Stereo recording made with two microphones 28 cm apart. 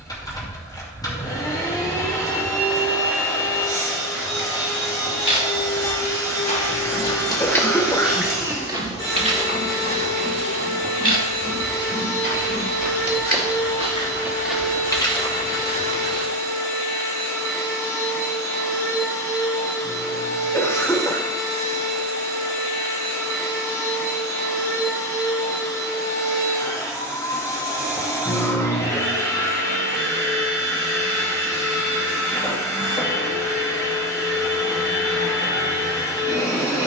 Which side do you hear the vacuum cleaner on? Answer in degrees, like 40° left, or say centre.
10° left.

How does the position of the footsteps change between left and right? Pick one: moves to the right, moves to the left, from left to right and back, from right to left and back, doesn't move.
from left to right and back.